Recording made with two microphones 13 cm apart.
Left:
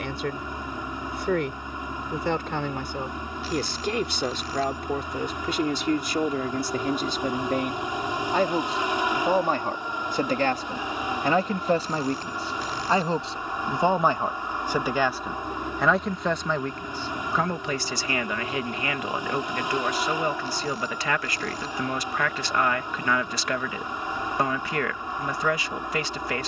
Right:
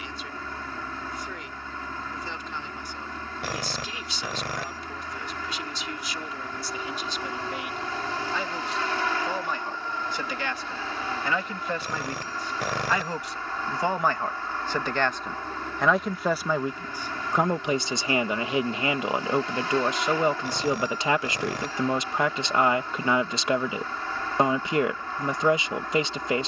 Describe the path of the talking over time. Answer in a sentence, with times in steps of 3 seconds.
You can hear the talking on the left from 0 s, in the centre from 15 s and on the right from 18 s.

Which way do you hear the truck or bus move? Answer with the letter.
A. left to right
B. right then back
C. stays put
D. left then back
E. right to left
C.